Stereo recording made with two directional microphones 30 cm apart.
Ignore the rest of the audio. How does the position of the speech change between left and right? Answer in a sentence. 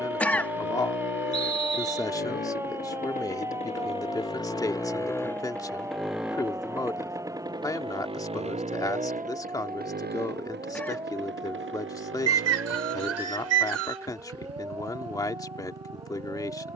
You can hear the speech stay put.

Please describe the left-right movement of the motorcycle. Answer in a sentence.
In this clip you hear the motorcycle go from the left side to the right.